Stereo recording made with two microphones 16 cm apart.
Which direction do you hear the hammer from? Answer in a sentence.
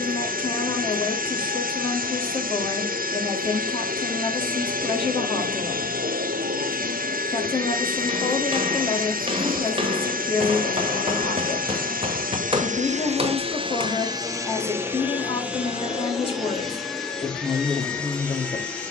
In this clip you hear the hammer on the right.